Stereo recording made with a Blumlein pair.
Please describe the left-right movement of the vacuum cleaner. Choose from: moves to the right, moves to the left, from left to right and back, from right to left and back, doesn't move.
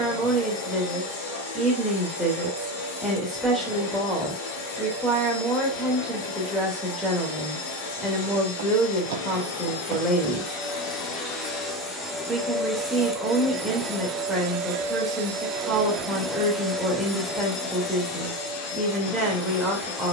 from left to right and back.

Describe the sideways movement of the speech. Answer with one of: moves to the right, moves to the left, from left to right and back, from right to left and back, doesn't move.
doesn't move.